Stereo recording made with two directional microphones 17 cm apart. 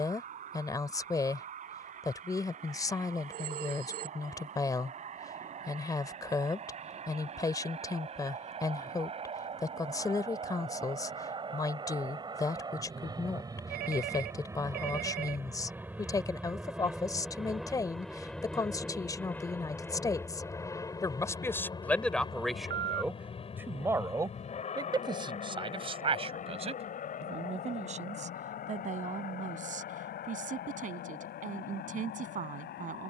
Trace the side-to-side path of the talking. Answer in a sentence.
In this clip you hear the talking go from the left side to the right.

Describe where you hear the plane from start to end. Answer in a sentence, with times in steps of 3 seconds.
You can hear the plane on the right from 0 s, in the centre from 15 s and on the left from 21 s.